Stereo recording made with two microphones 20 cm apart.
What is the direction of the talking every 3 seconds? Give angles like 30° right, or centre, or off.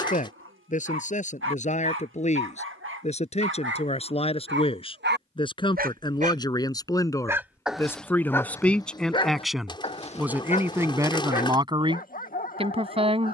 40° left, 30° left, 10° left, 10° right, 30° right.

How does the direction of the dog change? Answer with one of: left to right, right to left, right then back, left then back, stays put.
right to left.